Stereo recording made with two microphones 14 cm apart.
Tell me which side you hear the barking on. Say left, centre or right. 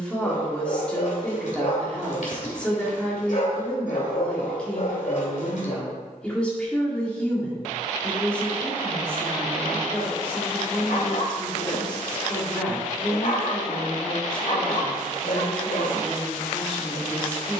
left.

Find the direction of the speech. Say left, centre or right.
centre.